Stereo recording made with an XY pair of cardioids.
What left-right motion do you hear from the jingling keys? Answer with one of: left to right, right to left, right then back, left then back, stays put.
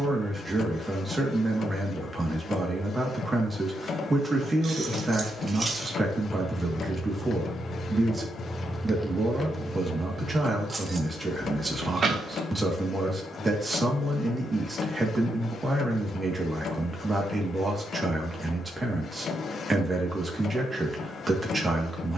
left then back.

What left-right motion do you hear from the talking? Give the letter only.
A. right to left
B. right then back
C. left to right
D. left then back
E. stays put
E.